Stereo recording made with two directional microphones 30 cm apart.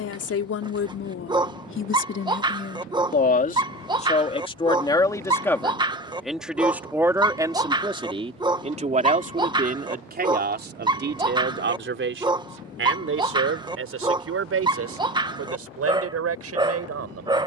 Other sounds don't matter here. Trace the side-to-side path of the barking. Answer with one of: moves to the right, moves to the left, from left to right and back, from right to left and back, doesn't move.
doesn't move.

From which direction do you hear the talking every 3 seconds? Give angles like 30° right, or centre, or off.
40° left, 20° left, 10° right, 30° right, 50° right, 50° right.